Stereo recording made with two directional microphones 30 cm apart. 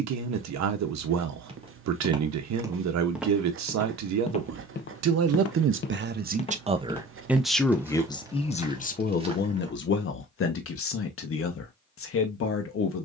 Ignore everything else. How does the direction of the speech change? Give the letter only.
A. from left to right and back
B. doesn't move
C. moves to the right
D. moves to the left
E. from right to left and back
D.